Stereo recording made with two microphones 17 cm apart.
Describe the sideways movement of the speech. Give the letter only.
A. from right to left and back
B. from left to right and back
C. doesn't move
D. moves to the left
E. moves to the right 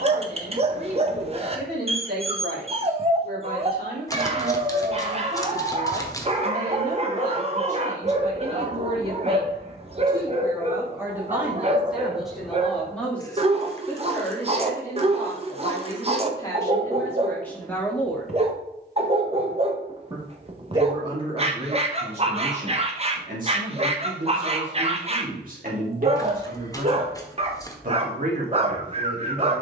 A.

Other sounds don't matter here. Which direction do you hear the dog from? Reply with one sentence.
You can hear the dog on the right.